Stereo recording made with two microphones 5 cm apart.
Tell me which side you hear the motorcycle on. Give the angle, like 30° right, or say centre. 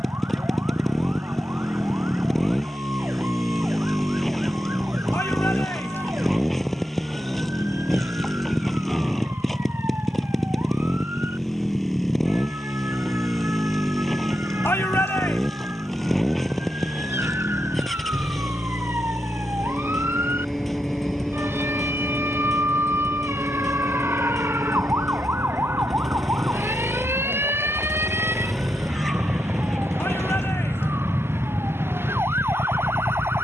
centre.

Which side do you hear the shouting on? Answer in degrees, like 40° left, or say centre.
60° left.